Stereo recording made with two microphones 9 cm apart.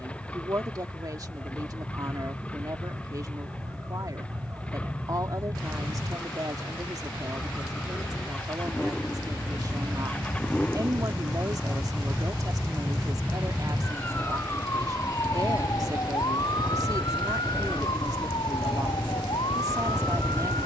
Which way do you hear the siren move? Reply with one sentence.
In this clip you hear the siren go from the right side to the left.